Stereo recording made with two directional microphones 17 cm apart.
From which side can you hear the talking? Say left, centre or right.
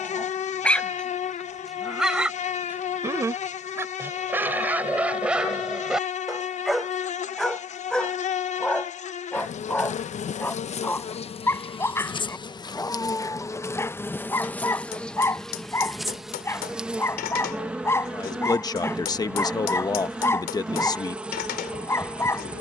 left.